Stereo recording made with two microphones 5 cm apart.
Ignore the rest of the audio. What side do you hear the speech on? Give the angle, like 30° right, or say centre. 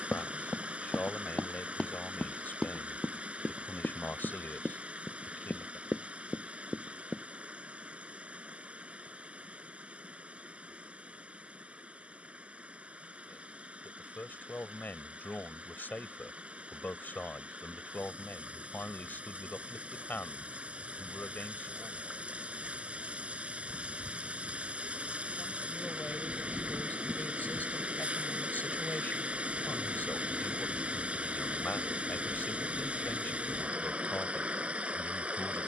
40° left.